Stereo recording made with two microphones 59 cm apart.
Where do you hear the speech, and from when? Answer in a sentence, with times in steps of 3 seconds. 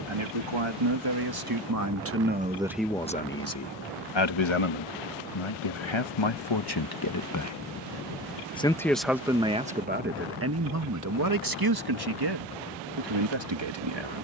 You can hear the speech on the right from 0 s, on the left from 3 s and on the right from 9 s.